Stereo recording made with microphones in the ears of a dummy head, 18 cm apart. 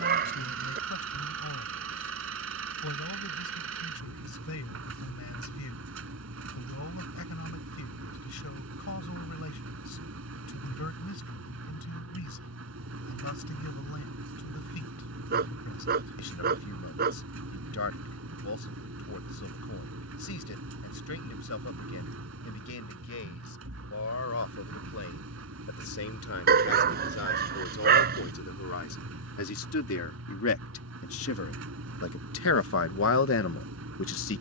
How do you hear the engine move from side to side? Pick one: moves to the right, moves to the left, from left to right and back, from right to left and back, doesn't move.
doesn't move.